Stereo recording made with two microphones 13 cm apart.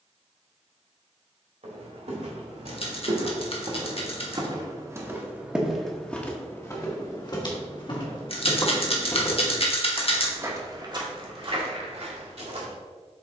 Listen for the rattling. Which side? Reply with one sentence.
You can hear the rattling on the left.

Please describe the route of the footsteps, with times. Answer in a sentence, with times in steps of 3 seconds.
You can hear the footsteps on the right from 0 s, on the left from 6 s and on the right from 9 s.